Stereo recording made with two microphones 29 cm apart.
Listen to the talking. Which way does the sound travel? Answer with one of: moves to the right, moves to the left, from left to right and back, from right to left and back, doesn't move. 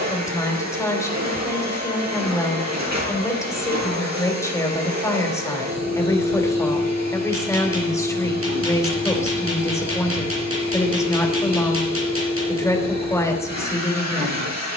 doesn't move.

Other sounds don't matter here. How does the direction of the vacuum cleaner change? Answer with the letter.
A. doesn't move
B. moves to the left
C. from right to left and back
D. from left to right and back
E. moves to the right
A.